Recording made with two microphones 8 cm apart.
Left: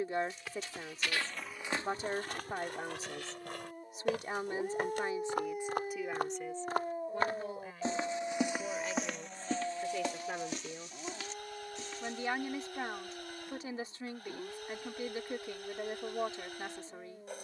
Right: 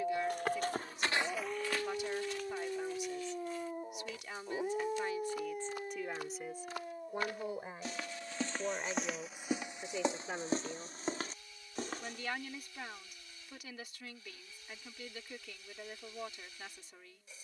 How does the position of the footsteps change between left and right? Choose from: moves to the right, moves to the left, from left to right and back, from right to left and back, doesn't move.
from right to left and back.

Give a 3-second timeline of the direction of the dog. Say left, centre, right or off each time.
right, centre, left, left, left, left.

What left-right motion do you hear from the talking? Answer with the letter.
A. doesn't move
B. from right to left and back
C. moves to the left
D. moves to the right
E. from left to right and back
E.